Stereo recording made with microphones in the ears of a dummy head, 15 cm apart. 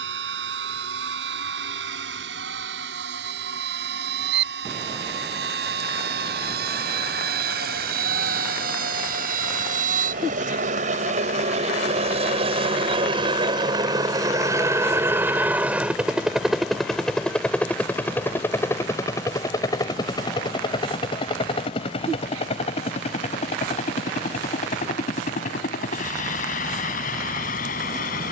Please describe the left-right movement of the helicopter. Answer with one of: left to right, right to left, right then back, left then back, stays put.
right to left.